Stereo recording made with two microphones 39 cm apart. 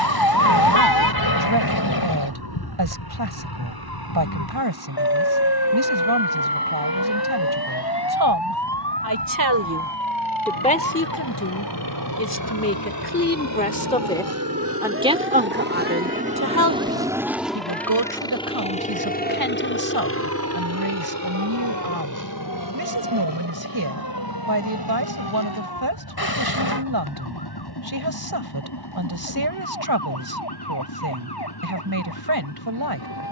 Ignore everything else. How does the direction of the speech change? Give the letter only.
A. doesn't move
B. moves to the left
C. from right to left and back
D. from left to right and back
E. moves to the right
C.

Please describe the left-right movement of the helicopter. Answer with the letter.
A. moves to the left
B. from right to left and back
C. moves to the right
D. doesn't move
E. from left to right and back
A.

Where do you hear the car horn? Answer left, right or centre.
left.